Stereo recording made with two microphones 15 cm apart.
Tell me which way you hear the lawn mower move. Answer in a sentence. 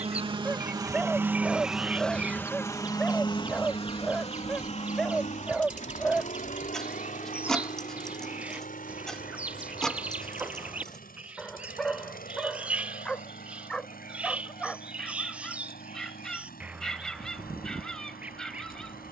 In this clip you hear the lawn mower go from the right side to the left.